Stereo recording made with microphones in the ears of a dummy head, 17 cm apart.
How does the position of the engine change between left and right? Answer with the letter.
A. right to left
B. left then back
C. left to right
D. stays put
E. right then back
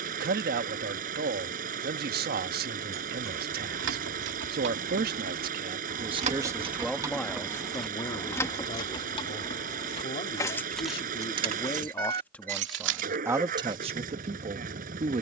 D.